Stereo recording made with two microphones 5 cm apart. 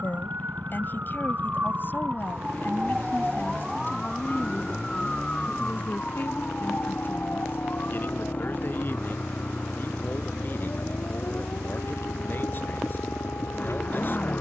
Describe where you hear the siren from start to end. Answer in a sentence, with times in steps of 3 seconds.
In this clip you hear the siren on the right from 0 s, in the centre from 3 s and on the left from 6 s.